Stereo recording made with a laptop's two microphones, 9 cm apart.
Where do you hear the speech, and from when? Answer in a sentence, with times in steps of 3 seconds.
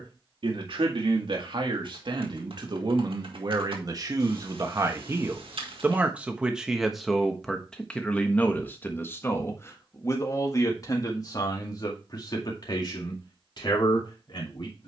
In this clip you hear the speech on the right from 0 s, in the centre from 6 s and on the left from 9 s.